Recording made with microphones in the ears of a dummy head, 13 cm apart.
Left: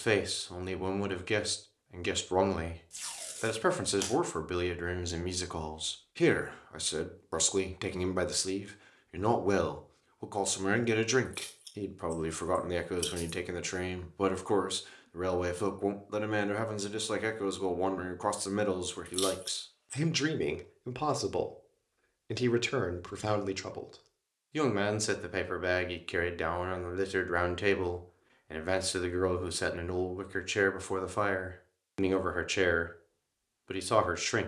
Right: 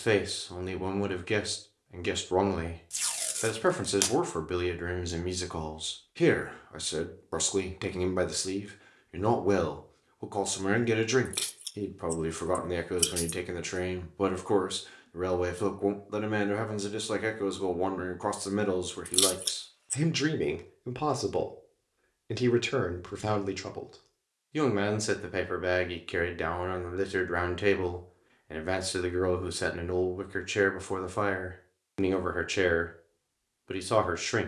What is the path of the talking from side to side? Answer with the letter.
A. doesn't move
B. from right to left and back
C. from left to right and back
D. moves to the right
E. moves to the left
A.